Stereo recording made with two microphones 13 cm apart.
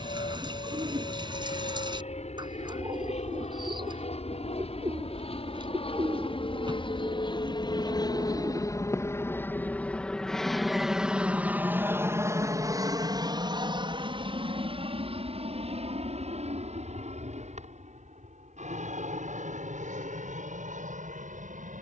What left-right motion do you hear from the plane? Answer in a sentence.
In this clip you hear the plane travel towards the right.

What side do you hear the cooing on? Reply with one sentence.
In this clip you hear the cooing on the right.